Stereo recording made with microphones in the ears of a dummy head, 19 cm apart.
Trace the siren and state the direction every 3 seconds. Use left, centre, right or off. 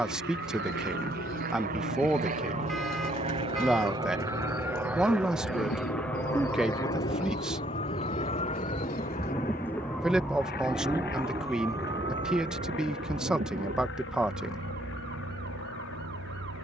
left, left, left, centre, right, right.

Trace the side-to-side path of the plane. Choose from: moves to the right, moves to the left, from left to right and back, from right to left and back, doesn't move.
moves to the left.